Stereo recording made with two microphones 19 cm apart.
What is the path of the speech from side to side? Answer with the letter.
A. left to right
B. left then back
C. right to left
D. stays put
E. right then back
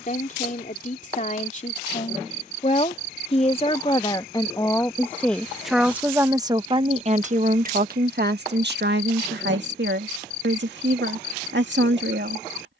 A.